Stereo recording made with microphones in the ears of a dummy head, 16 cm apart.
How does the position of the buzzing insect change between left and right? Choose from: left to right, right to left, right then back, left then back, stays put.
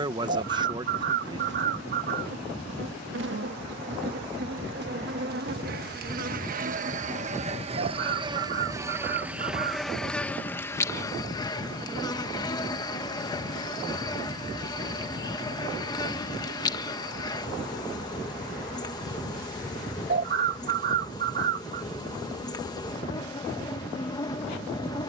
right to left.